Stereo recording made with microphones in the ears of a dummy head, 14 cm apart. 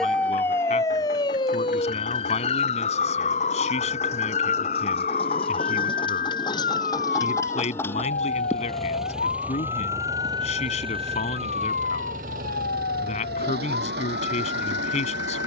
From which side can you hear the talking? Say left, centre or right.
left.